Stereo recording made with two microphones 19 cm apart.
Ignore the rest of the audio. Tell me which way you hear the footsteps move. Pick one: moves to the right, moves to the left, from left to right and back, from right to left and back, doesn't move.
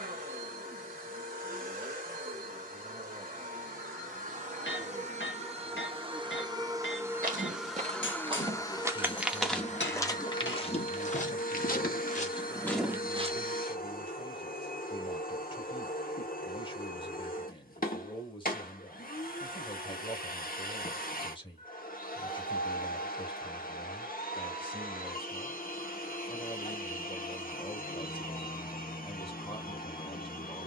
from right to left and back.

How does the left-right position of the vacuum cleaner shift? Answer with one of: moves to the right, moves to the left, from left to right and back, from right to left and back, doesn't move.
moves to the left.